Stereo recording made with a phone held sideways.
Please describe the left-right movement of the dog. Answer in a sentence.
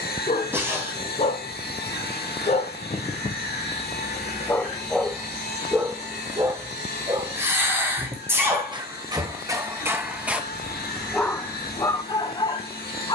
In this clip you hear the dog go right and come back.